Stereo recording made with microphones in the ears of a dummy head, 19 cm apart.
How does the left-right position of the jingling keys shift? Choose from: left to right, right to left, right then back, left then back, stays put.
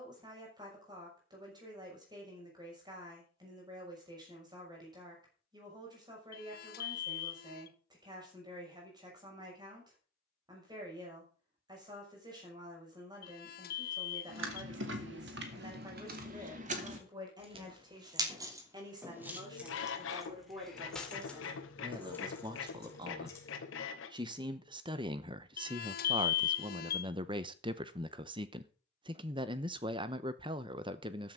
right to left.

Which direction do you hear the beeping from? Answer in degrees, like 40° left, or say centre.
50° left.